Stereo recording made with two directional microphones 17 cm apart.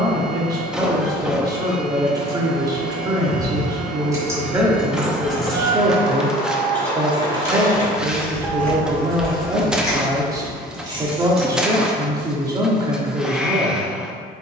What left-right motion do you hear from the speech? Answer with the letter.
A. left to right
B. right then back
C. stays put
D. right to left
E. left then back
C.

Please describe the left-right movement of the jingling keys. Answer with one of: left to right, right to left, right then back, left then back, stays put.
left then back.